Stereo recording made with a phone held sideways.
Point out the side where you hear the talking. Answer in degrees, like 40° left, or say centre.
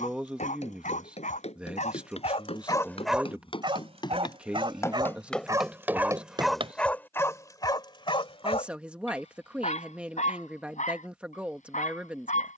10° right.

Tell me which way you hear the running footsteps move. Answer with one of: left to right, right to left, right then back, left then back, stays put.
left to right.